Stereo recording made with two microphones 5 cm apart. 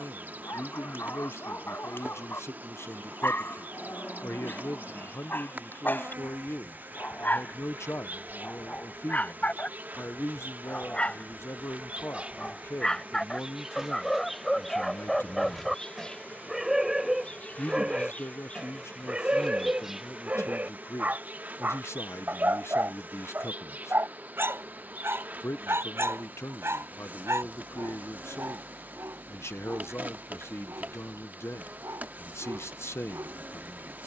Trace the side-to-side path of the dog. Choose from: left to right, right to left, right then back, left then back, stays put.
left to right.